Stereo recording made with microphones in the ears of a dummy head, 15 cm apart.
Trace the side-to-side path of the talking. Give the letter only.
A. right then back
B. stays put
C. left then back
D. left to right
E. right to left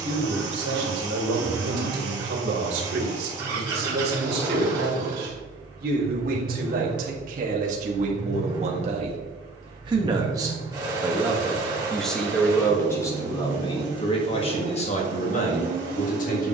E.